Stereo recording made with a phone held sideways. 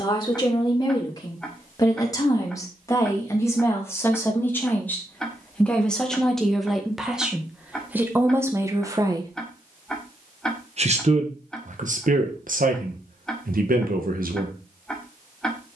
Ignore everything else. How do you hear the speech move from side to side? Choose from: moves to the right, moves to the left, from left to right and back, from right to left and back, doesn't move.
moves to the right.